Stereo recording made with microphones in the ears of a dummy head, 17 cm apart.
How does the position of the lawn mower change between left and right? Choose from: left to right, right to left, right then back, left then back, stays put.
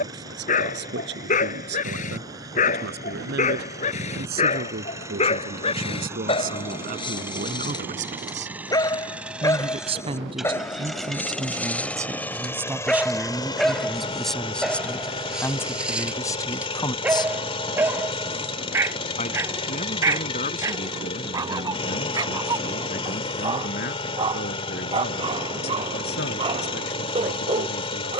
right to left.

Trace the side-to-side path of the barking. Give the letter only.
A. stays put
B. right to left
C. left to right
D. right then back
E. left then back
C.